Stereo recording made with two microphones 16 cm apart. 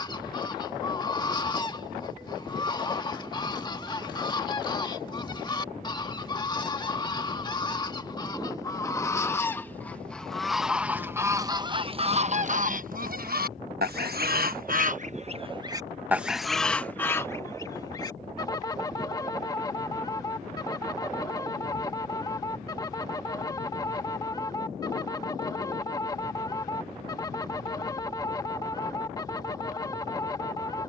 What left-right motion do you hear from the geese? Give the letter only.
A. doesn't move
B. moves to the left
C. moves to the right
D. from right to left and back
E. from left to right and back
E.